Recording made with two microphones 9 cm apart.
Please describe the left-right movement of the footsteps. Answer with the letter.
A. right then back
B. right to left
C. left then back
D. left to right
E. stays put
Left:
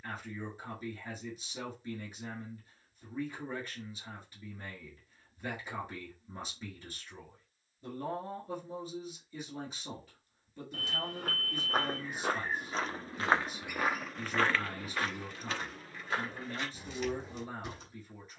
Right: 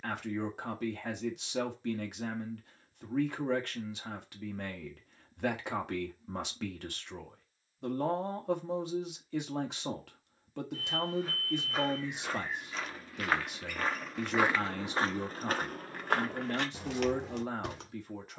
D.